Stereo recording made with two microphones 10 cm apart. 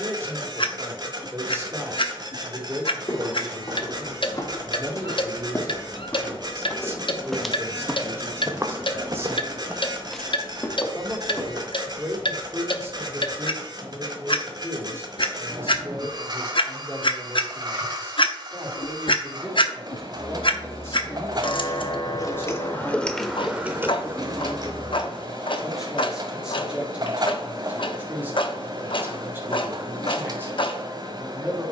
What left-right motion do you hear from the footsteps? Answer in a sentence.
You can hear the footsteps move from left to right and back again.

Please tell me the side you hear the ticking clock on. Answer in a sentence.
In this clip you hear the ticking clock on the left.